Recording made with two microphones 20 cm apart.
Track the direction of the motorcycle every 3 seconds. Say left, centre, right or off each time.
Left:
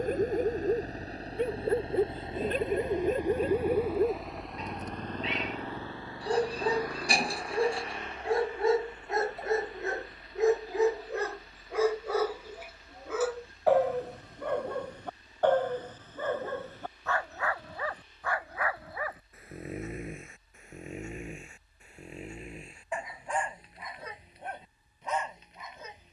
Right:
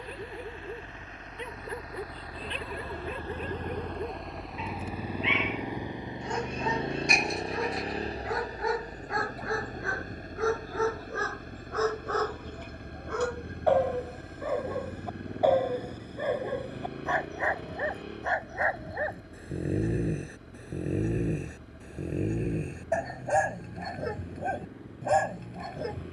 left, centre, right, right, right, right, right, right, right.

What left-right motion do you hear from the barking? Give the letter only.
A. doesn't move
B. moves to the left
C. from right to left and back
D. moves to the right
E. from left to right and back
D.